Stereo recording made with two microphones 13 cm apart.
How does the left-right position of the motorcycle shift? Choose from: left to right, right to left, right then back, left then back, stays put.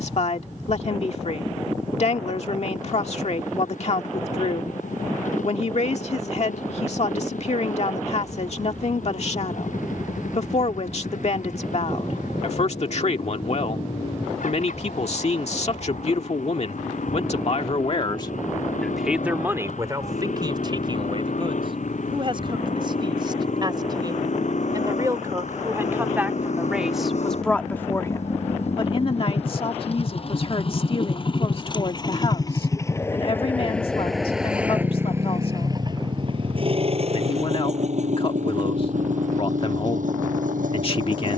left to right.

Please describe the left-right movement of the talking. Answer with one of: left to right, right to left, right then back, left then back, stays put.
right then back.